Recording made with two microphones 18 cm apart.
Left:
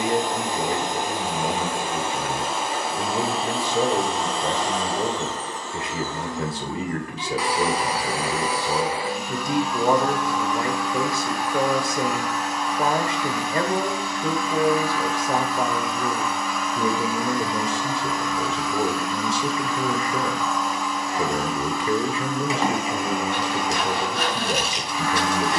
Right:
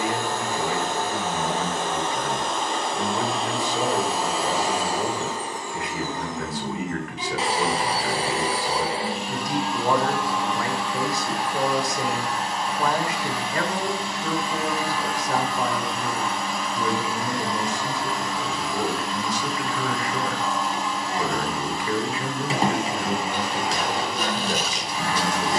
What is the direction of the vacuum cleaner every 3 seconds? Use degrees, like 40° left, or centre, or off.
10° left, 10° right, 30° right, 30° right, 30° right, 30° right, 30° right, 30° right, 30° right.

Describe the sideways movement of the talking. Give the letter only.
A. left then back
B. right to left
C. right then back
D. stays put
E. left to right
D.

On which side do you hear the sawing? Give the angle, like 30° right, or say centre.
70° left.